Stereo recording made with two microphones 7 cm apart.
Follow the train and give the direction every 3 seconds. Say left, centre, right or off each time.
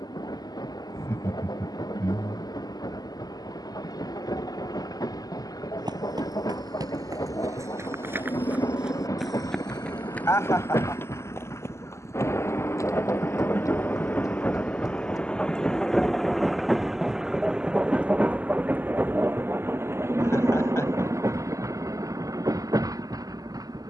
left, left, left, left, left, centre, right, right.